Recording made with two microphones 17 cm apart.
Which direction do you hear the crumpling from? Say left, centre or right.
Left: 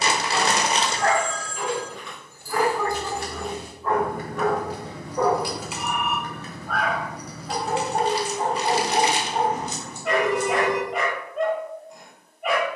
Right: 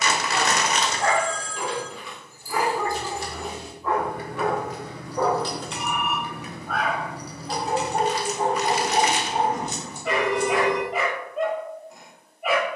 left.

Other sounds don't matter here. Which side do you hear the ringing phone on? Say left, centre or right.
right.